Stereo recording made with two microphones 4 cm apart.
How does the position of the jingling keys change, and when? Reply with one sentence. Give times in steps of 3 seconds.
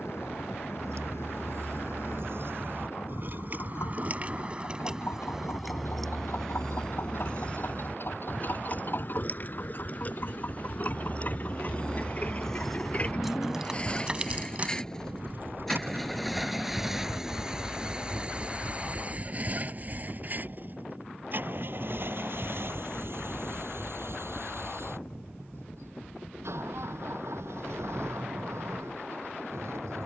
You can hear the jingling keys on the right from 0 s, on the left from 6 s, in the centre from 12 s, on the right from 15 s and not at all from 18 s.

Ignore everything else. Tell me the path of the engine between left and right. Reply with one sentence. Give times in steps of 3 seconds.
You can hear the engine on the left from 0 s, in the centre from 15 s and on the right from 18 s.